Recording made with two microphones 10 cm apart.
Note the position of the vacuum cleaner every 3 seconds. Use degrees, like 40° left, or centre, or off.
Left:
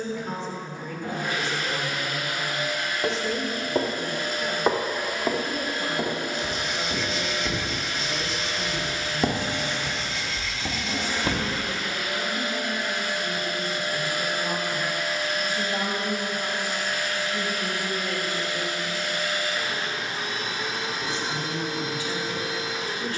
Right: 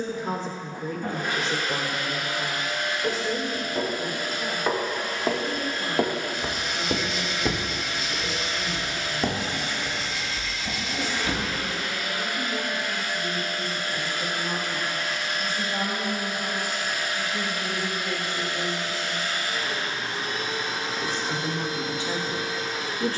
50° right, 10° right, 40° left, 40° left, 20° left, 10° right, 40° right, 40° right.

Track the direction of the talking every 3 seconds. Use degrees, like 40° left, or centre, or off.
30° right, centre, 10° left, 20° left, 20° left, 10° left, centre, 30° right.